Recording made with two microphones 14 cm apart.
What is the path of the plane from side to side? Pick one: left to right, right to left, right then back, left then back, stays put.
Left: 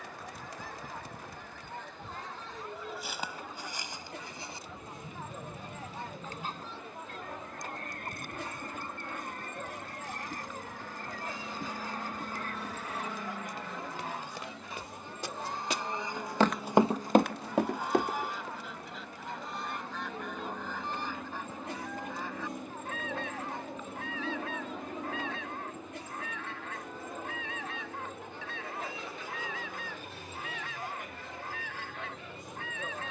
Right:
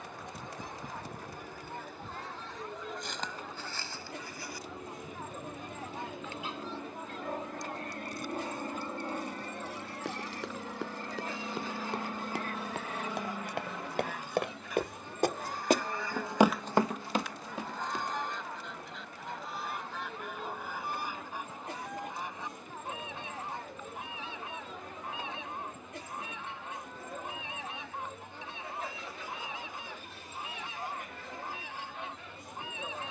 right to left.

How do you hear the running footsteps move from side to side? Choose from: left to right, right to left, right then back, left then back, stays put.
right to left.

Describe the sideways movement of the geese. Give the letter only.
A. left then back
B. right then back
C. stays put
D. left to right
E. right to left
A.